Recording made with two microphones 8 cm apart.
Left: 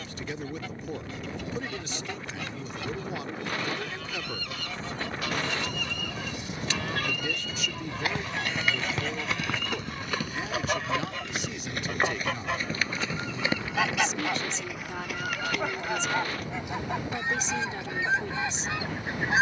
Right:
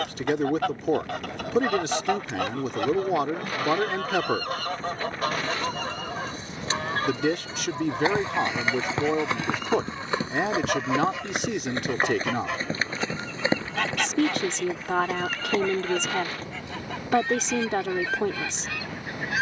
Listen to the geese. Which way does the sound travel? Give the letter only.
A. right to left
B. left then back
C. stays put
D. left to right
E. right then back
A.